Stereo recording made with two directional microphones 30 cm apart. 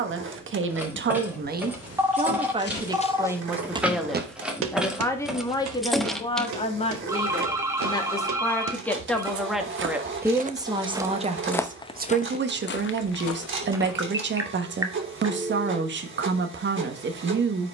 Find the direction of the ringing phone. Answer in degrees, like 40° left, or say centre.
10° right.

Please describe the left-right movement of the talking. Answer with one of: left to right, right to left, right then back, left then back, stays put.
left then back.